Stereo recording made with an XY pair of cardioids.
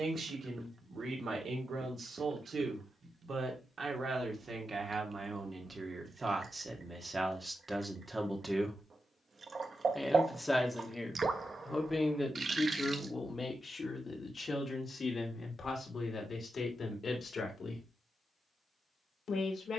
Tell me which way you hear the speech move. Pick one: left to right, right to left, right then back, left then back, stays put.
right to left.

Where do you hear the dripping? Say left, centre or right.
right.